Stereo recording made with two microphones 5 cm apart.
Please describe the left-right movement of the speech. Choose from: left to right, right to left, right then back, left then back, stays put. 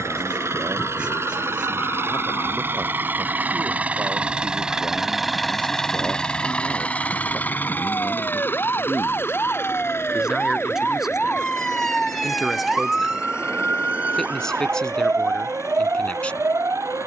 right to left.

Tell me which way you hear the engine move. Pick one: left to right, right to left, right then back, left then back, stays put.
right to left.